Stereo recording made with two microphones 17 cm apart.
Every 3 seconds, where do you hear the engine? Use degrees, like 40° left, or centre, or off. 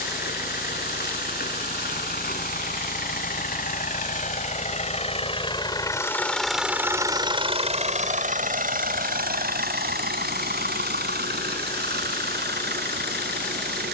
70° left, 50° left, 30° right, 70° right, 80° right.